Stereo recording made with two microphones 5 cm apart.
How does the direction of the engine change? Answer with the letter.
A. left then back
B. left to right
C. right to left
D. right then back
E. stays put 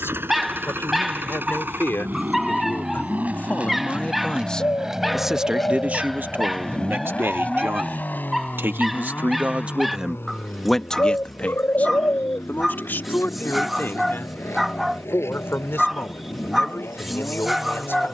C.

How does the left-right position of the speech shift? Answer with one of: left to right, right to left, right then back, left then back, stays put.
right then back.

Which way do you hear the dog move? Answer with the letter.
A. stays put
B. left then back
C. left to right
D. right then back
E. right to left
A.